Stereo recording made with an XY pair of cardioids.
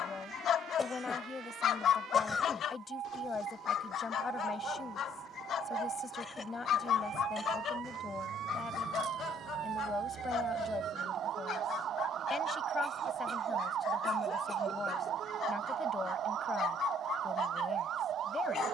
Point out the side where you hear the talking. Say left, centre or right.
left.